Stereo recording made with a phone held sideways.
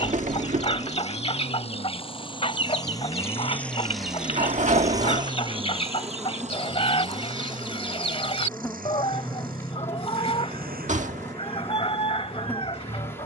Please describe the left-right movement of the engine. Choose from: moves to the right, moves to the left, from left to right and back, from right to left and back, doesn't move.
moves to the right.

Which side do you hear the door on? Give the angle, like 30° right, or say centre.
50° right.